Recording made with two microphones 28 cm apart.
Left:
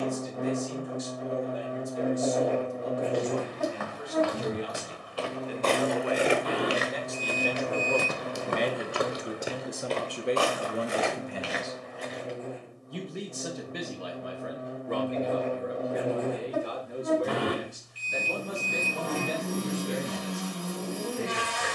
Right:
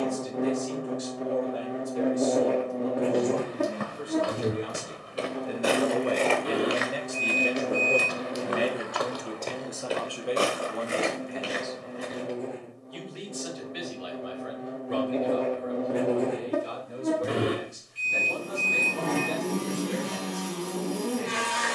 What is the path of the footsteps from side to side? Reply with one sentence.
You can hear the footsteps go left and come back.